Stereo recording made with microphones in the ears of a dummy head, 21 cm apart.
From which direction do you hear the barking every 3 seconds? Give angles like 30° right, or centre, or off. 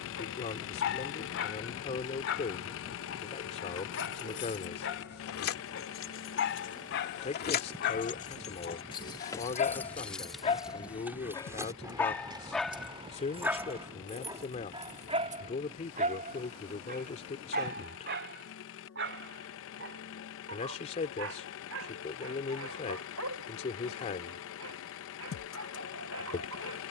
60° left, 60° left, 50° left, 30° left, 10° right, 40° right, 50° right, 60° right, 60° right.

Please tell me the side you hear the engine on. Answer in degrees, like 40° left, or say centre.
60° left.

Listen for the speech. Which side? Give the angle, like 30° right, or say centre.
30° left.